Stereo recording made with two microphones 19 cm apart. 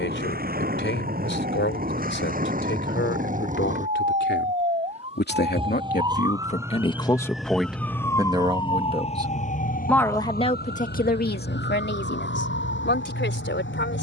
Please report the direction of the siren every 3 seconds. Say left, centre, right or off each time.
right, right, centre, left, left.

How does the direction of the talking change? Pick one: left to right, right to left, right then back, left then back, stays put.
right then back.